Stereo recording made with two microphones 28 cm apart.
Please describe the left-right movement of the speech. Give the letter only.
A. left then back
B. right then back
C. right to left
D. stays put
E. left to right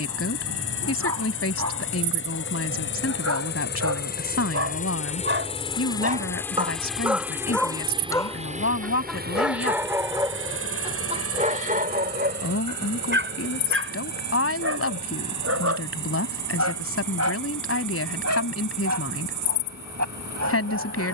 D.